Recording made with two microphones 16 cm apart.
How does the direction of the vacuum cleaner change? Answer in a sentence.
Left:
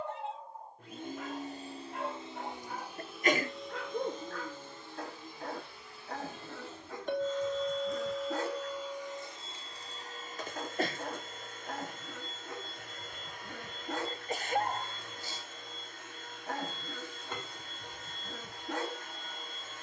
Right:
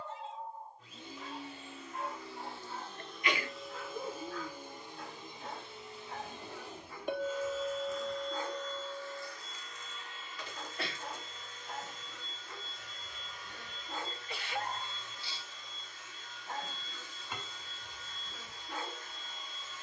You can hear the vacuum cleaner go right and come back.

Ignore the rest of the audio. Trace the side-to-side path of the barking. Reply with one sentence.
In this clip you hear the barking stay in one place.